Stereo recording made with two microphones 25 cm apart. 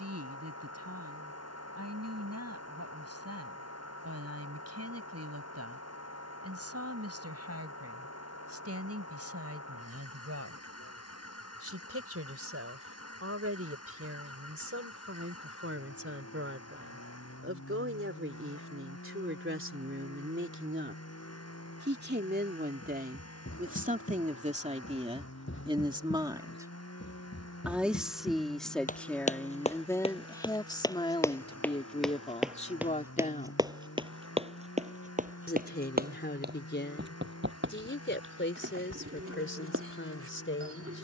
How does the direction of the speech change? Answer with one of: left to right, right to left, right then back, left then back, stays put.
right to left.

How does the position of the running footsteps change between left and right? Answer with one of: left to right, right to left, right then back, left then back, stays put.
left to right.